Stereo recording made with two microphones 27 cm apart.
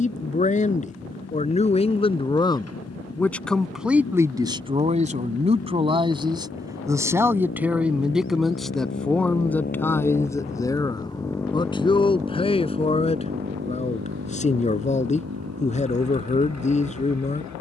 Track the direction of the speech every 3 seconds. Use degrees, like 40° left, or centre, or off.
20° left, 10° right, 10° right, 10° left, 20° left, 30° left.